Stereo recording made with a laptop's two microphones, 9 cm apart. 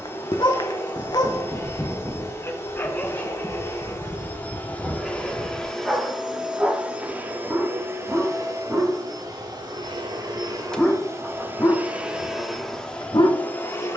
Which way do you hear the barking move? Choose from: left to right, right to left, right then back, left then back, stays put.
right then back.